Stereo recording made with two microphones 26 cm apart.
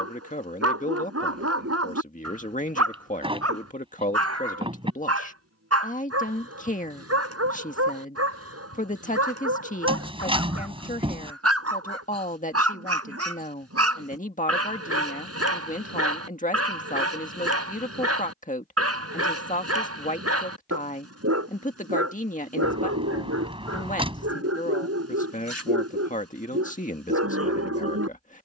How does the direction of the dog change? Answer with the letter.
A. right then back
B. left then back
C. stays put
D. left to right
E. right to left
C.